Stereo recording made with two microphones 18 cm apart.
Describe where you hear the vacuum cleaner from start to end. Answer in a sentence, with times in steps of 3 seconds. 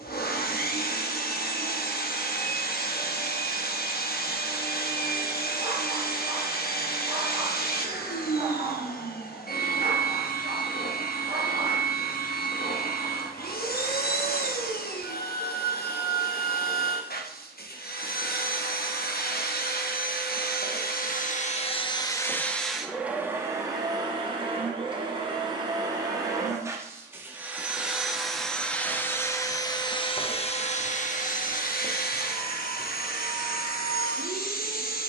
In this clip you hear the vacuum cleaner on the left from 0 s, in the centre from 21 s, on the right from 24 s, in the centre from 27 s and on the left from 30 s.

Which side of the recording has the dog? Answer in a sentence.
You can hear the dog on the right.